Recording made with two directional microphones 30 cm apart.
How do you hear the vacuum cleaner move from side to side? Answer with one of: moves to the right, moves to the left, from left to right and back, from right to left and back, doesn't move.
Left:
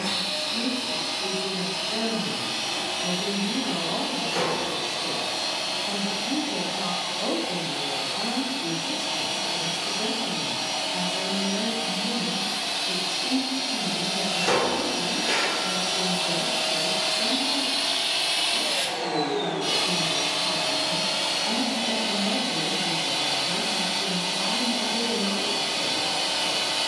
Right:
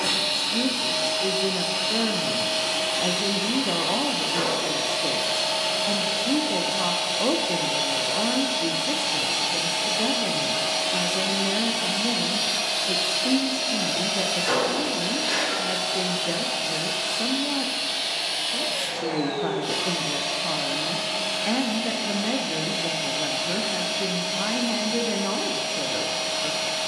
moves to the left.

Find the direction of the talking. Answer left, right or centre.
right.